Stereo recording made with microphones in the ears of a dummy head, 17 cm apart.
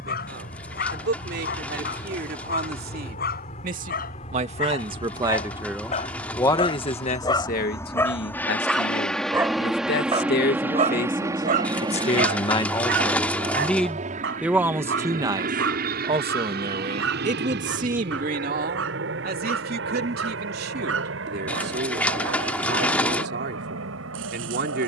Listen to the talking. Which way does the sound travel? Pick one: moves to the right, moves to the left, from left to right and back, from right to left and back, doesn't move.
from right to left and back.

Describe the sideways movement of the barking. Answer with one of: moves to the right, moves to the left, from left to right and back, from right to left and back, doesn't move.
moves to the right.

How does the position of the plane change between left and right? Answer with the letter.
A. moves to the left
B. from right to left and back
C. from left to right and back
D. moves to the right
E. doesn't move
D.